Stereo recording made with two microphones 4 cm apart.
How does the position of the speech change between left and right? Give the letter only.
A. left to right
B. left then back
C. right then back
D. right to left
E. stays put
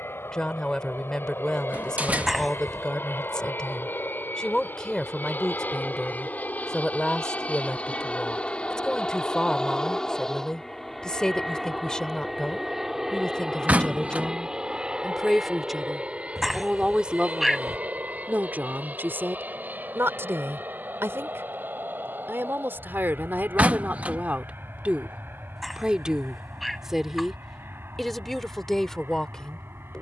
C.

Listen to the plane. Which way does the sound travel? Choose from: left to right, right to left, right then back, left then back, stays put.
left to right.